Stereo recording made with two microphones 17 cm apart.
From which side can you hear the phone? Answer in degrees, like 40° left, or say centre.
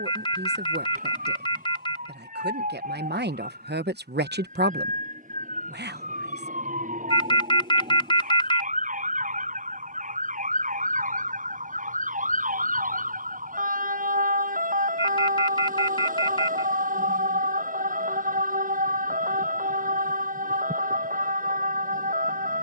30° left.